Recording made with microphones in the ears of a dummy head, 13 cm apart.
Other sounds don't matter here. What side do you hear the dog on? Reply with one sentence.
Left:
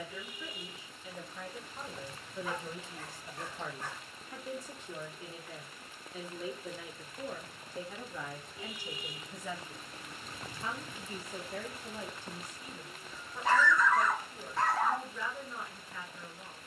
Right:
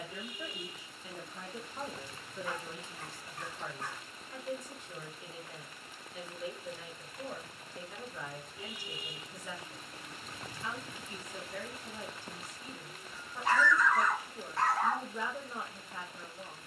In this clip you hear the dog on the left.